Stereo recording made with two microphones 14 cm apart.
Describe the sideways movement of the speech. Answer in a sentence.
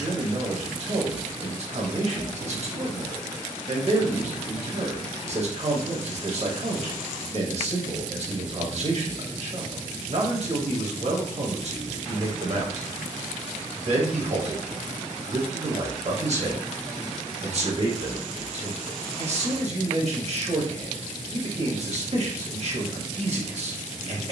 You can hear the speech stay in one place.